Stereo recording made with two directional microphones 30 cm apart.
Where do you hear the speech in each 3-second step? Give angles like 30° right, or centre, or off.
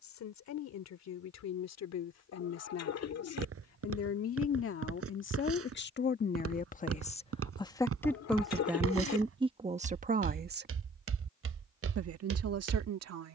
60° left, 50° left, 10° left, 20° right, 50° right.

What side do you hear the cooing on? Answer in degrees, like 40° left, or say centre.
60° left.